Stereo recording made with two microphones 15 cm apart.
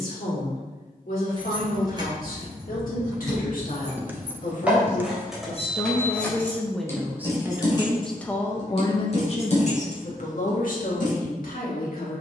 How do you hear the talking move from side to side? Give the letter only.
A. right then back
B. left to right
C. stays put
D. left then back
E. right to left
A.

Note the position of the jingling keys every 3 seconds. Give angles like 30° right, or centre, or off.
30° right, 10° right, 30° left, 50° left.